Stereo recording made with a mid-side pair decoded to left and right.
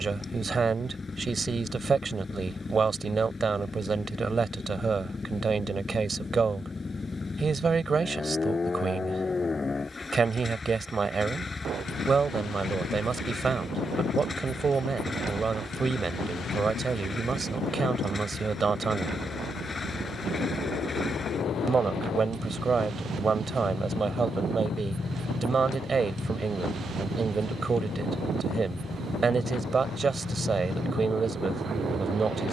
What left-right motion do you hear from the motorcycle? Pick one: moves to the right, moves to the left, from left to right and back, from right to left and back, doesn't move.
doesn't move.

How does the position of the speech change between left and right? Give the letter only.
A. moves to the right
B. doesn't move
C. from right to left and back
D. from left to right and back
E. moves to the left
B.